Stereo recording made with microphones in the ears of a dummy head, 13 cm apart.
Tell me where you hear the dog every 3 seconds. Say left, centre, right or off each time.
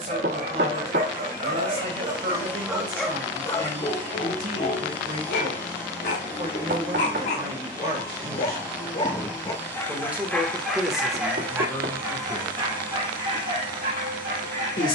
right, left, left, centre, right.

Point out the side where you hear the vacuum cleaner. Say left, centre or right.
right.